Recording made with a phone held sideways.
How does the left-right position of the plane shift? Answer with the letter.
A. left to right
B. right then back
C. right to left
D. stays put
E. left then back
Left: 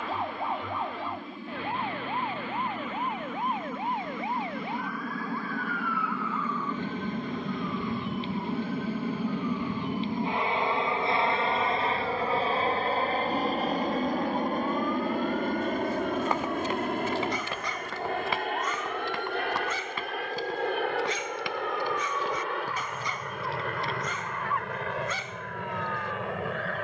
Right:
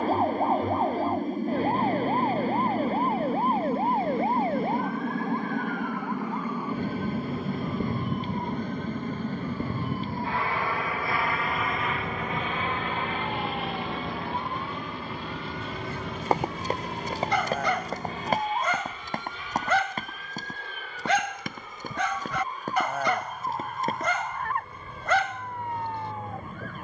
C.